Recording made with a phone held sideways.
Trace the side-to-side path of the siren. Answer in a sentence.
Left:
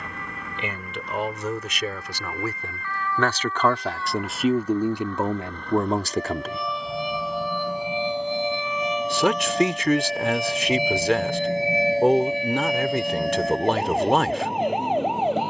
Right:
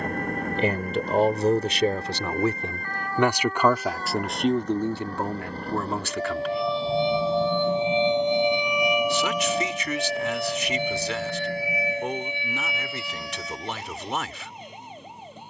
You can hear the siren move to the left.